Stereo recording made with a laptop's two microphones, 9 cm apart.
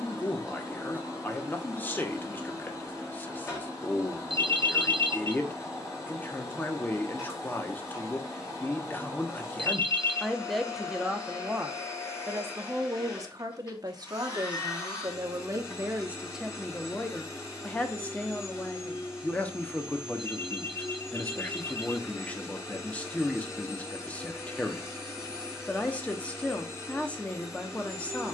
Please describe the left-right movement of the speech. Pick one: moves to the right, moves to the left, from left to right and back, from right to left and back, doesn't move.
from left to right and back.